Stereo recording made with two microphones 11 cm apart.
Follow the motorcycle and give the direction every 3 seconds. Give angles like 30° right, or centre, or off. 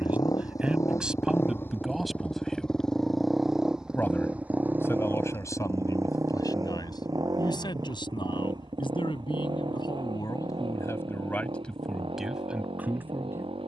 20° left, 10° right, 40° right, 50° right, 60° right.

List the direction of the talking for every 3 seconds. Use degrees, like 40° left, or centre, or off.
10° right, 20° left, 40° left, 30° left, 10° right.